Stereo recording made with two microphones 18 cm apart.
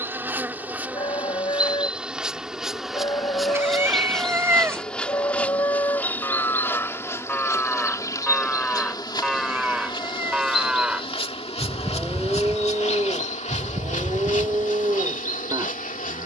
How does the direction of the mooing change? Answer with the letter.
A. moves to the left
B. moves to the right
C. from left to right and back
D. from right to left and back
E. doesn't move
B.